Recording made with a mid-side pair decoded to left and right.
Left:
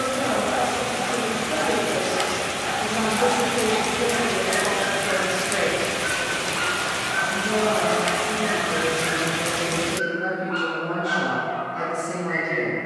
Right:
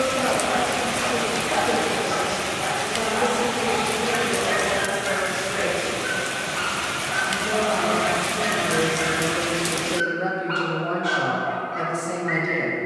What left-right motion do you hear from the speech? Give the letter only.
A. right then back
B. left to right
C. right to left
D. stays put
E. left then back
E.